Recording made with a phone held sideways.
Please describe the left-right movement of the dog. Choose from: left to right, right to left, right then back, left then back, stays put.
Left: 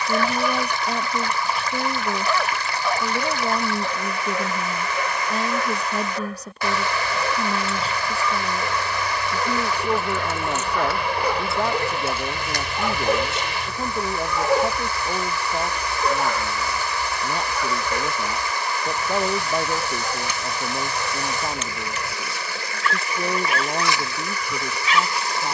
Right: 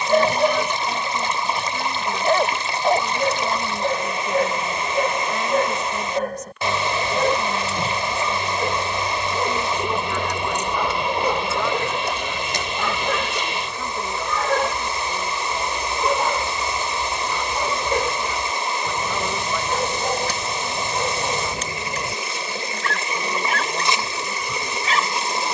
left then back.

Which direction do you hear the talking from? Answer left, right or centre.
left.